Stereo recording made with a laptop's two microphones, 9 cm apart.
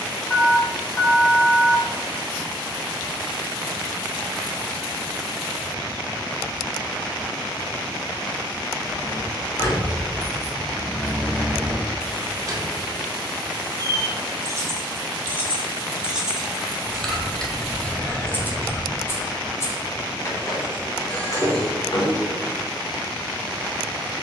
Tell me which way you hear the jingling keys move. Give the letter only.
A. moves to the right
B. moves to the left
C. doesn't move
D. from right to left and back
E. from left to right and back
E.